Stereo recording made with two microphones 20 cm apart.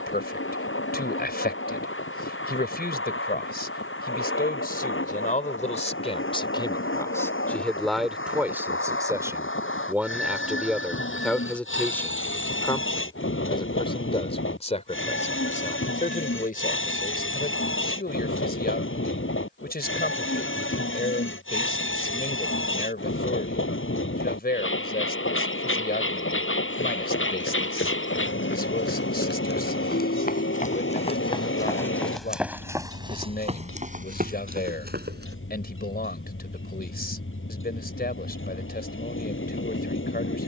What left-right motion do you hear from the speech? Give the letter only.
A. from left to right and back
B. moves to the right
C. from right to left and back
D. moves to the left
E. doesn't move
A.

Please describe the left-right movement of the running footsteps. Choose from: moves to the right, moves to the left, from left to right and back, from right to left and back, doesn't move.
moves to the right.